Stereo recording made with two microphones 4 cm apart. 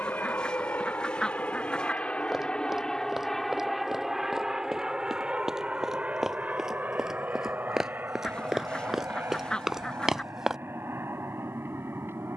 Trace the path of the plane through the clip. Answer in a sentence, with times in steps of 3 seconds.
In this clip you hear the plane on the left from 0 s, in the centre from 3 s and on the right from 6 s.